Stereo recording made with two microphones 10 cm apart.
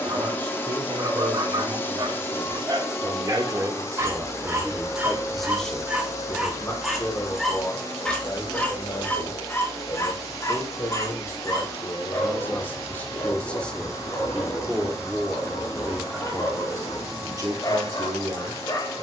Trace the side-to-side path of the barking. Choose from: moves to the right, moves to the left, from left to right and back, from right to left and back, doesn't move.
moves to the left.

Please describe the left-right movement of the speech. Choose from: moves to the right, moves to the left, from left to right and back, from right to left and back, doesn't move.
from right to left and back.